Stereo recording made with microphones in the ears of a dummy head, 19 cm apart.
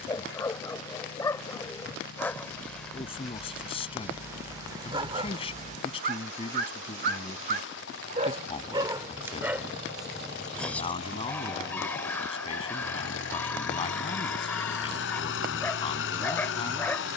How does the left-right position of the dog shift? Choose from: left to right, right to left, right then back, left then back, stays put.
right then back.